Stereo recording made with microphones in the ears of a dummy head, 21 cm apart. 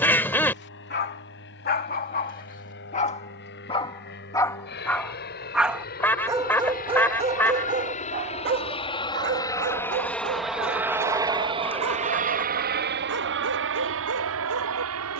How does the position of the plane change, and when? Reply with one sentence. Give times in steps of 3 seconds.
You can hear the plane on the left from 0 s, in the centre from 9 s and on the right from 12 s.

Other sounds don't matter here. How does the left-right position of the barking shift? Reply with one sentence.
In this clip you hear the barking go from the left side to the right.